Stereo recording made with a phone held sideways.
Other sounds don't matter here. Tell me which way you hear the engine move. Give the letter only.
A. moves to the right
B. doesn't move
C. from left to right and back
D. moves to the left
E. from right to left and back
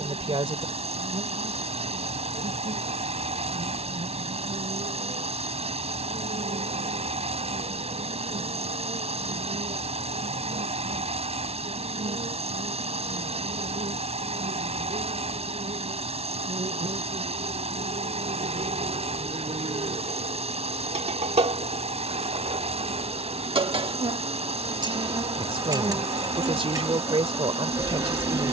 B.